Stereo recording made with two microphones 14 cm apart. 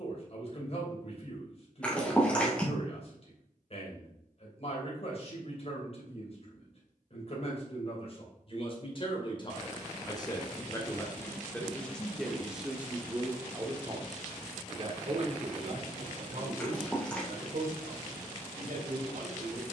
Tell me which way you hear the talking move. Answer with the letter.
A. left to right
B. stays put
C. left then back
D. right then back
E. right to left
A.